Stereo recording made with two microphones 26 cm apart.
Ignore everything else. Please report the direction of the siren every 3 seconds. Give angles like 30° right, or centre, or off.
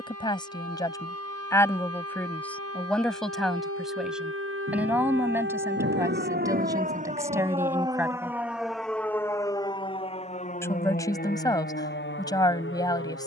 70° right, 50° right, 20° right, 30° left, 50° left.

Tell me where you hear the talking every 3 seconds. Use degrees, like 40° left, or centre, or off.
10° left, centre, 10° right, 10° left, 10° left.